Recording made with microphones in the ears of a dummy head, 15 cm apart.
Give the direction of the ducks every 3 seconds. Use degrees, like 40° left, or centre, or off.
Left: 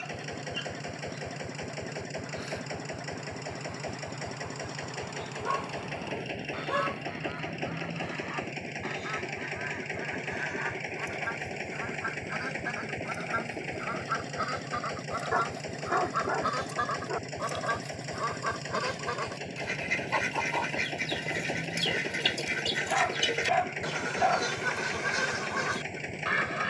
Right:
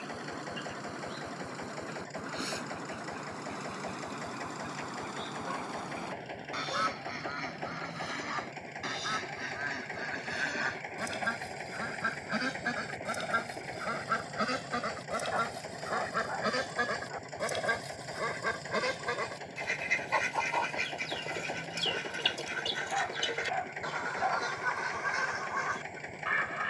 60° right, 50° right, 50° right, 40° right, 40° right, 20° right, centre, 20° left, 40° left.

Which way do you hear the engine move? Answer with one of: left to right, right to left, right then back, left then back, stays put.
stays put.